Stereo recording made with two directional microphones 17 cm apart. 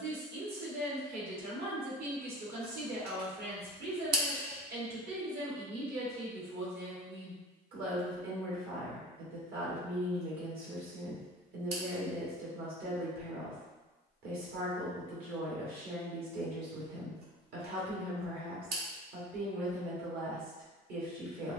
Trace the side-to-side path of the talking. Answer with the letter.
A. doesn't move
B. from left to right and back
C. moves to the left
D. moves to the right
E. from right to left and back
A.